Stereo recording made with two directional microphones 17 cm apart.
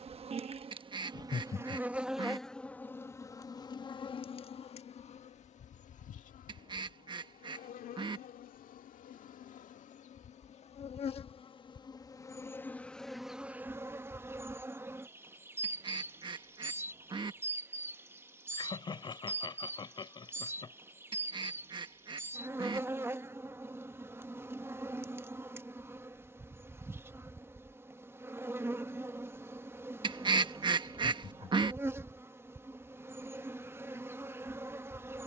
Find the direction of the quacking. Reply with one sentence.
In this clip you hear the quacking on the right.